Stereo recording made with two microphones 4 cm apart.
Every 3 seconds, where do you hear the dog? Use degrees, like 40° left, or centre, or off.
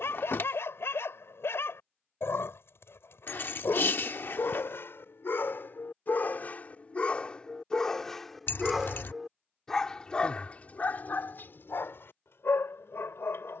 80° left, 70° left, 20° left, 40° left, 70° left.